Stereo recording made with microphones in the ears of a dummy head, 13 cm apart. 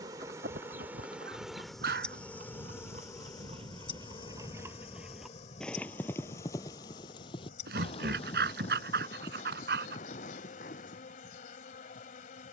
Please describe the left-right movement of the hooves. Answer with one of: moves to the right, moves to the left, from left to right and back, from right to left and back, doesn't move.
moves to the left.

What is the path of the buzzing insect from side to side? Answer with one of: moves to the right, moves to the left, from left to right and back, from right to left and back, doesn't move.
moves to the left.